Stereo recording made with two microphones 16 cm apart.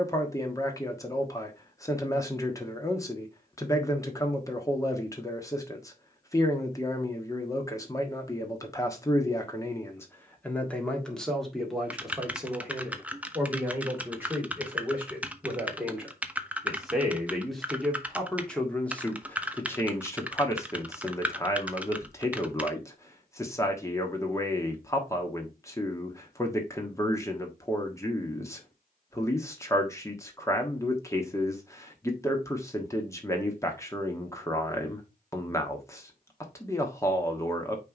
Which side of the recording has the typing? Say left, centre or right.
centre.